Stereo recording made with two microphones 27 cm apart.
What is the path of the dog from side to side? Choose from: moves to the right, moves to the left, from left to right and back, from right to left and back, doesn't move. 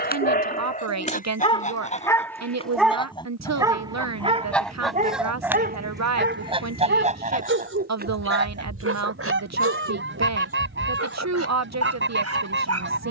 moves to the right.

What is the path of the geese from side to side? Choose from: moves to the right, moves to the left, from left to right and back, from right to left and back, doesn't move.
moves to the right.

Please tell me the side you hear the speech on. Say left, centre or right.
right.